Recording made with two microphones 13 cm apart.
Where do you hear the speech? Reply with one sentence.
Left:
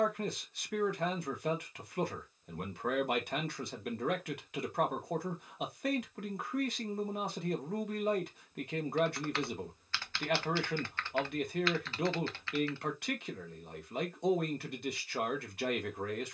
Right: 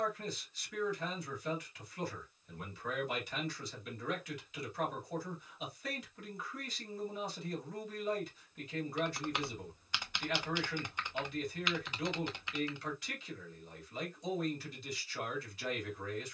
In this clip you hear the speech on the left.